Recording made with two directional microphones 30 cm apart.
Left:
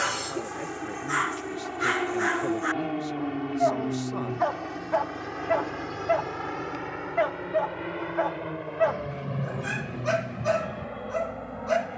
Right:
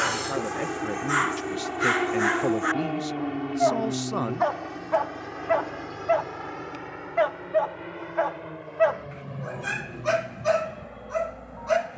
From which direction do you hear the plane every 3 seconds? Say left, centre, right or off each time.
right, centre, left, left.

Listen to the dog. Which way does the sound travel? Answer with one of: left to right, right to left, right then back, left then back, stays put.
stays put.